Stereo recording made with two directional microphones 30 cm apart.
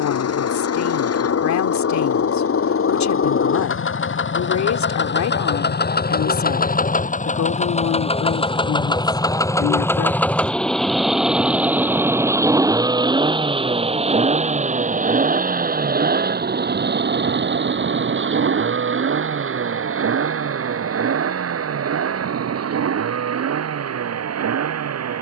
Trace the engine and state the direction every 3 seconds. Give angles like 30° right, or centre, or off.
50° left, 40° left, 20° left, centre, 20° right, 30° right, 40° right, 50° right, 60° right.